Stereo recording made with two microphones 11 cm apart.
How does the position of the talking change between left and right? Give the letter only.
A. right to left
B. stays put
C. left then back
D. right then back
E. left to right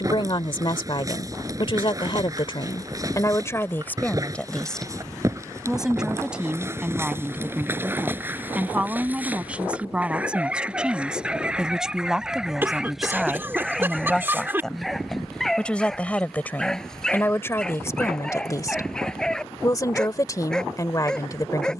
D.